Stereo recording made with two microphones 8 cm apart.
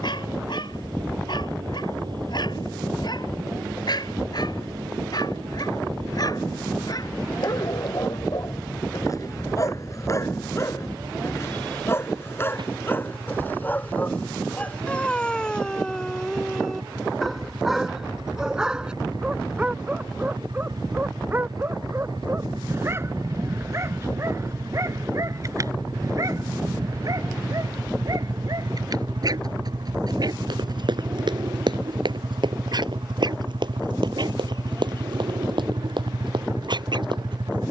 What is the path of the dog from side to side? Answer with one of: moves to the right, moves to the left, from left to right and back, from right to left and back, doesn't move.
moves to the right.